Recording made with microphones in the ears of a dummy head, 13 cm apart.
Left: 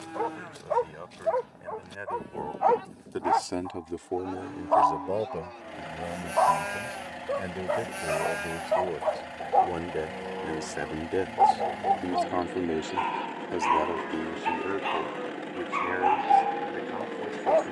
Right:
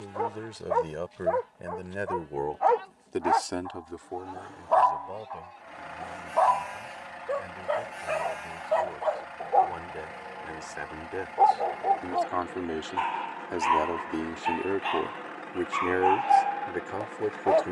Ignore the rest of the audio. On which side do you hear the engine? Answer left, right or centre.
left.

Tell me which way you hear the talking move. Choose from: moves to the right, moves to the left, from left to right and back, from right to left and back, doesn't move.
from right to left and back.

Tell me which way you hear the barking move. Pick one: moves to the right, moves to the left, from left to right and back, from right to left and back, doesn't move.
doesn't move.